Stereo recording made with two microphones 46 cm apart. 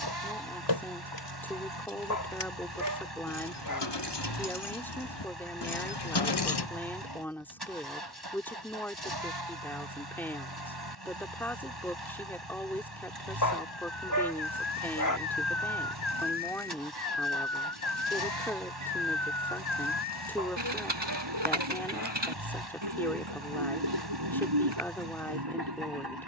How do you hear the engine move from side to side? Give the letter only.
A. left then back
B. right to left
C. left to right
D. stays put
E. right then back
D.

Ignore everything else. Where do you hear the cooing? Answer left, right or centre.
right.